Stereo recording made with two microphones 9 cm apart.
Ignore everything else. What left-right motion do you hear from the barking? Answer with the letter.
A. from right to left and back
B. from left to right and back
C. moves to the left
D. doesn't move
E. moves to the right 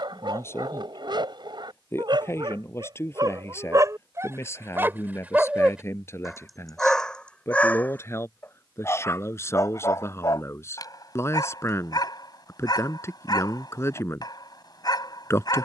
C.